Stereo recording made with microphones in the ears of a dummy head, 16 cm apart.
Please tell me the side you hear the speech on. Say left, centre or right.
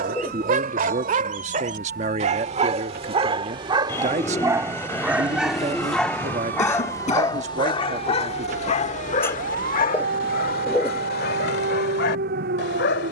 right.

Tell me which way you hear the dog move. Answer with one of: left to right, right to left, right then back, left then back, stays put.
right to left.